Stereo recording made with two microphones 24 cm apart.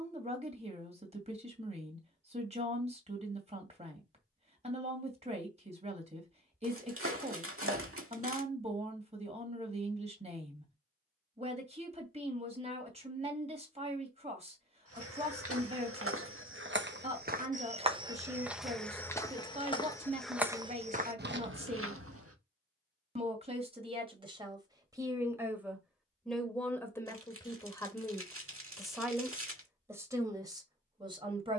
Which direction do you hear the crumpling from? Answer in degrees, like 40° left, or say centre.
70° right.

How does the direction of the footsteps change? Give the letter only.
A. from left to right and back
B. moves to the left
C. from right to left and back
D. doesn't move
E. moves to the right
C.